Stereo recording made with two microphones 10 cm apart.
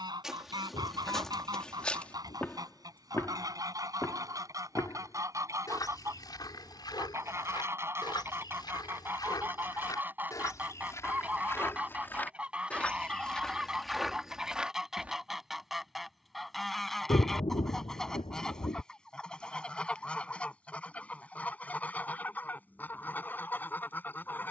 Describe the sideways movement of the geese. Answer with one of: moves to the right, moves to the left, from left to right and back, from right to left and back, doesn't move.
moves to the left.